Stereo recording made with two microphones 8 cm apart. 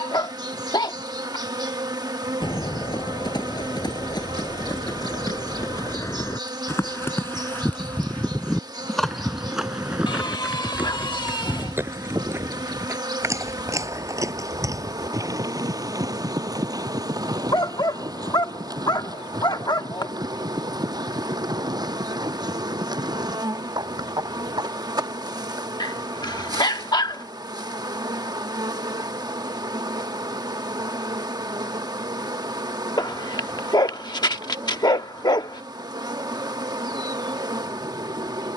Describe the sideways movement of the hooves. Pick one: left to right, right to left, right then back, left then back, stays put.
left to right.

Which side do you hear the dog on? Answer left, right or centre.
left.